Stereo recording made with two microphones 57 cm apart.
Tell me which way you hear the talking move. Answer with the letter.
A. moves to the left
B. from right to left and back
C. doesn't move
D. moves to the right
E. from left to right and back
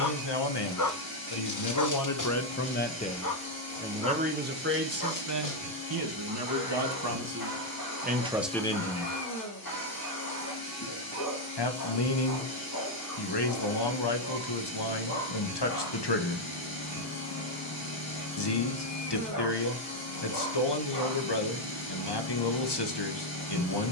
E.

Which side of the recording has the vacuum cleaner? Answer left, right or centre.
left.